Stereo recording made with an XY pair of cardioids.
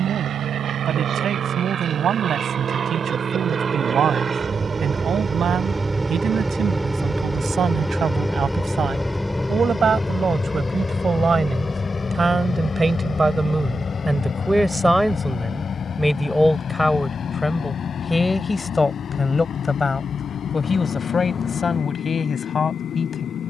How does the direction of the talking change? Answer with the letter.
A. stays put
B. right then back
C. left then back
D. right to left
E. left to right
D.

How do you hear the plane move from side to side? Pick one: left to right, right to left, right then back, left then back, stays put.
right to left.